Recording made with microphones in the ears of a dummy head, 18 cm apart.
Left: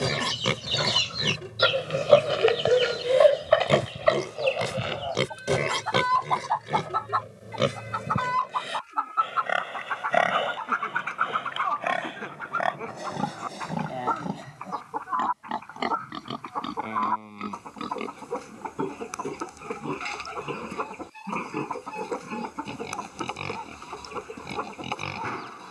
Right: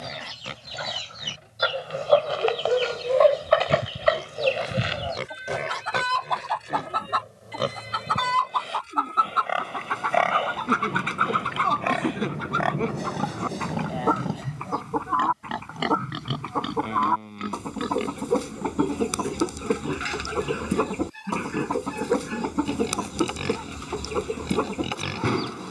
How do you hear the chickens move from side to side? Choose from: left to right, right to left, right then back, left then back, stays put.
left to right.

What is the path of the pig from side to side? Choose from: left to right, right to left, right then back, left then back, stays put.
left to right.